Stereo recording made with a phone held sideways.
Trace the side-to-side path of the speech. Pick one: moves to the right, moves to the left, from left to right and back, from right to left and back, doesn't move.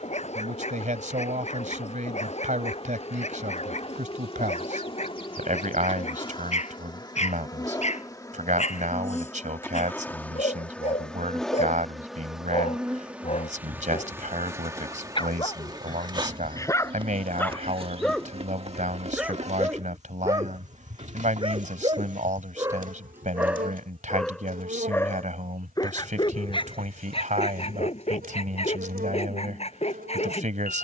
doesn't move.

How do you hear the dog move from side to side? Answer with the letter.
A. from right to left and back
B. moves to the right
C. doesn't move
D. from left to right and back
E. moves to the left
D.